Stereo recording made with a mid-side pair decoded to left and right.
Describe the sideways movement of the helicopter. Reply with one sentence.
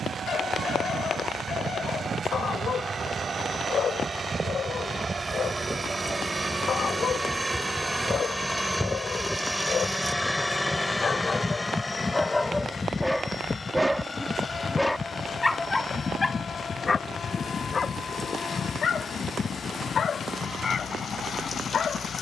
You can hear the helicopter go from the right side to the left.